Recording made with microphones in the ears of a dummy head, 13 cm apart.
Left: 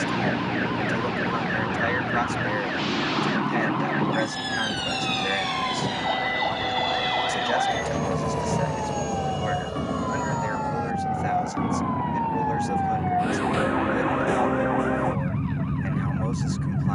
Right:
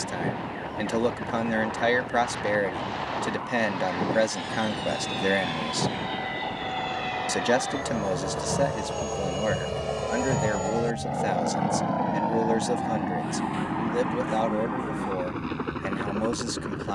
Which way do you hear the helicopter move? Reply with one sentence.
In this clip you hear the helicopter move to the right.